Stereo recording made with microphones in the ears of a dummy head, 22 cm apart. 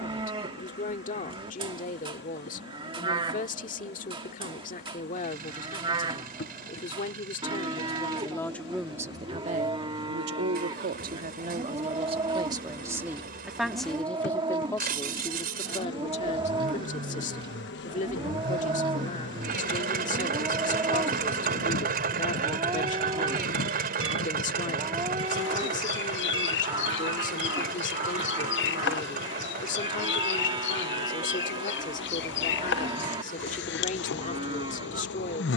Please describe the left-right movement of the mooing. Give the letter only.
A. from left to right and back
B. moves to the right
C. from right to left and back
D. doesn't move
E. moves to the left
D.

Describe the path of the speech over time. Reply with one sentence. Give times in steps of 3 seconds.
In this clip you hear the speech on the left from 0 s, on the right from 9 s, in the centre from 12 s and on the left from 15 s.